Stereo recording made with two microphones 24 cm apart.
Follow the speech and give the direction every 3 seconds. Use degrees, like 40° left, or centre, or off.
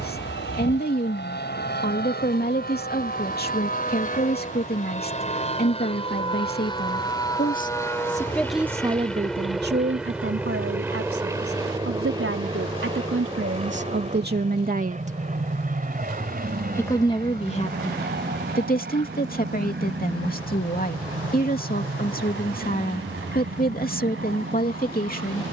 40° left, 40° left, 20° left, 60° right, 50° right, 20° left, 40° left, 40° left, 40° left.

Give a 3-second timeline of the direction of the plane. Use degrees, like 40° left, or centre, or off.
50° left, 30° left, 10° left, 10° right, 20° right, 40° right, 50° right, 50° right, 50° right.